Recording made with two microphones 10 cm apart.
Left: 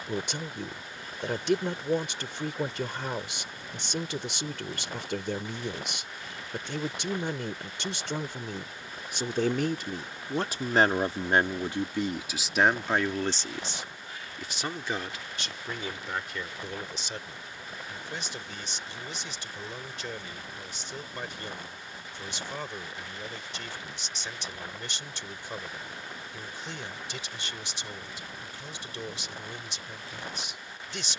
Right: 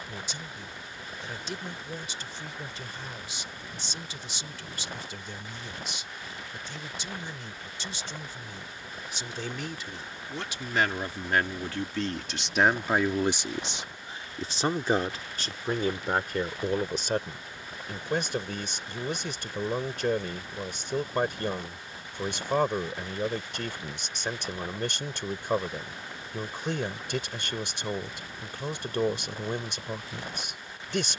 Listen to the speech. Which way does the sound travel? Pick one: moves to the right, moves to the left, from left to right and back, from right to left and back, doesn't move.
moves to the right.